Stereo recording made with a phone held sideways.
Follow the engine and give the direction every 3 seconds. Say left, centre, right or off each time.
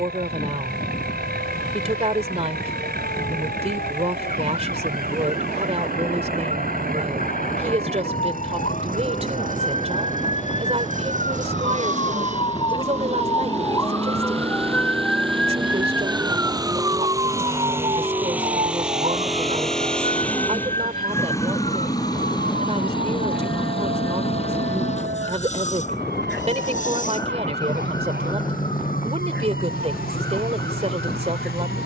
right, right, right, right, right, right, centre, left, left, left, left.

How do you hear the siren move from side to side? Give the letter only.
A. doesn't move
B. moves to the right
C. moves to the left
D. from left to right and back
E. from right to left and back
B.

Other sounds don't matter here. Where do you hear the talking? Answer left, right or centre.
right.